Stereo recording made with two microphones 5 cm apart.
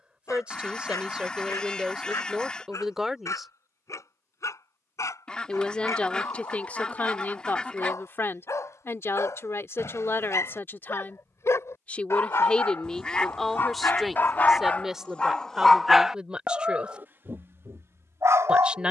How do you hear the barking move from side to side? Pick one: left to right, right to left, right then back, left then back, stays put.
left to right.